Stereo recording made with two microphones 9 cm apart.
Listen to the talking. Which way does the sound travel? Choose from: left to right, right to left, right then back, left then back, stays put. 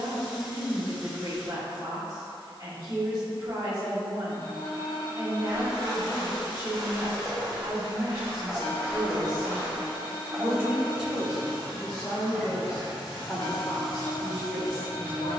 right to left.